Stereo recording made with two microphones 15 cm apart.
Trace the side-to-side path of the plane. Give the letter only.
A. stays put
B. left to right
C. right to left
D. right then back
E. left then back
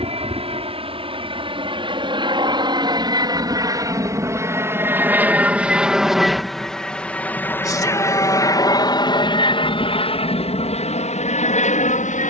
C.